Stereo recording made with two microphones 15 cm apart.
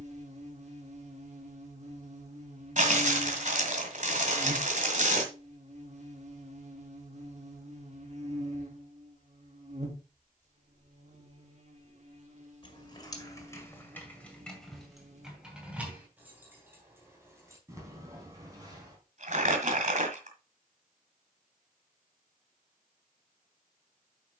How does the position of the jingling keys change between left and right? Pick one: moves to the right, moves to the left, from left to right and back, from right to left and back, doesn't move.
moves to the right.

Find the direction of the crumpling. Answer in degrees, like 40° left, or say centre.
50° right.